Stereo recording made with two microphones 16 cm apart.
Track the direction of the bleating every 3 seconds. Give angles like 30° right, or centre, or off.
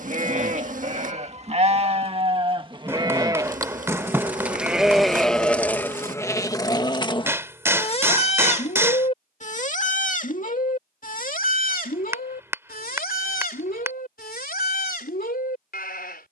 40° right, 10° right, 30° left, 60° left, 70° left, 70° left.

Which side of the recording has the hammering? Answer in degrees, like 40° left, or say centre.
20° right.